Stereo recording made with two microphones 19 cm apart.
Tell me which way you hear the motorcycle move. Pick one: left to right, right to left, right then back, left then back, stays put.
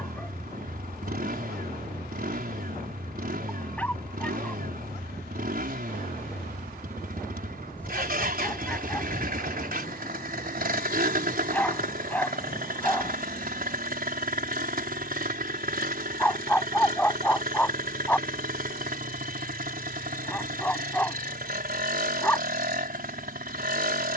stays put.